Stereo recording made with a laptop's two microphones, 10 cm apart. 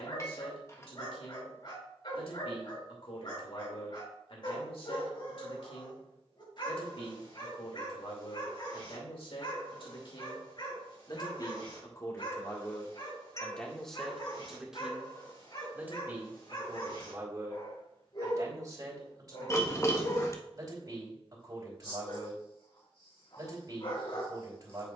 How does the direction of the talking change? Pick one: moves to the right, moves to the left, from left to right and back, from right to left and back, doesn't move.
moves to the right.